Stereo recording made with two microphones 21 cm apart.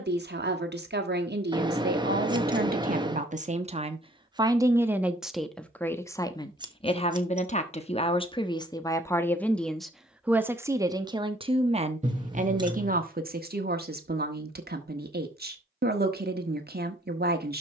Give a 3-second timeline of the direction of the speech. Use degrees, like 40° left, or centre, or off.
50° right, 20° right, 20° left, 10° right, 50° right, 50° right.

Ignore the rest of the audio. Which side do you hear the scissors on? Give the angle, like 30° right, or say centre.
20° right.